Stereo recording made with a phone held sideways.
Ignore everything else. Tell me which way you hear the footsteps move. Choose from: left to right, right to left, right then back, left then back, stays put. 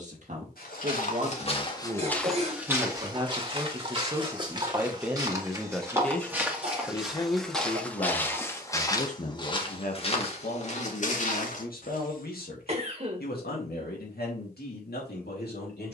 right then back.